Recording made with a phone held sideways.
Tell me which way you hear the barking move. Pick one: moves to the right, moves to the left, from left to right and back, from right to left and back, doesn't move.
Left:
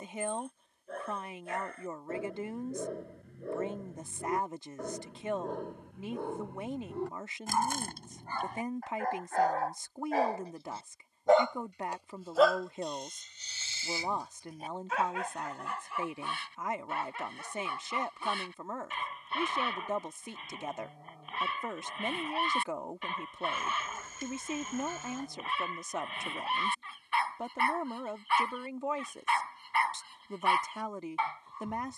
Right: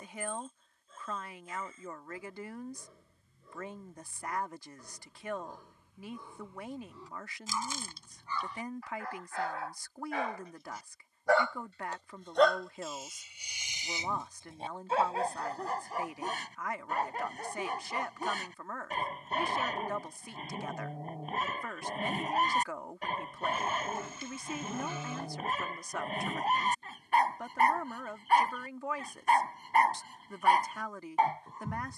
moves to the right.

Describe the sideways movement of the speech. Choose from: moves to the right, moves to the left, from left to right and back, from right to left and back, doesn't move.
doesn't move.